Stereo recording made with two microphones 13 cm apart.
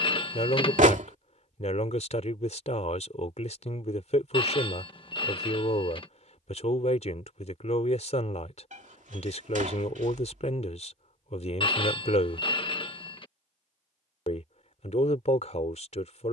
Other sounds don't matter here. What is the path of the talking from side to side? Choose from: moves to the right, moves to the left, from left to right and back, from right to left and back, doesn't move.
doesn't move.